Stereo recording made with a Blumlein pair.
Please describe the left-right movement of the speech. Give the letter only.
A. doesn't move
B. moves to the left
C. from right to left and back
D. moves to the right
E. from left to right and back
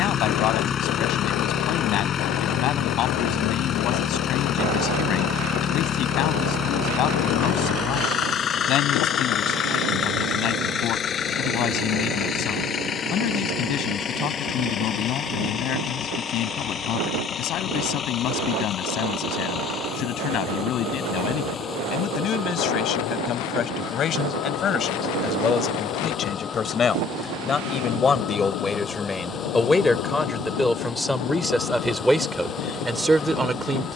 D.